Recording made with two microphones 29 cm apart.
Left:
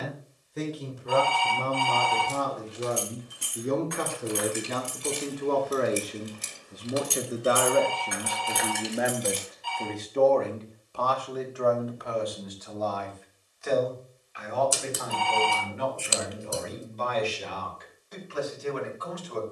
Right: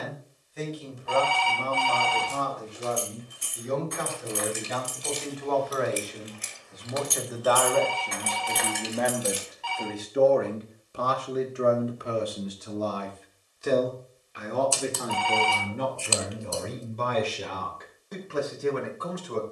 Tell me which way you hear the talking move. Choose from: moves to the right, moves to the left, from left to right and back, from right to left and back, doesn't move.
moves to the right.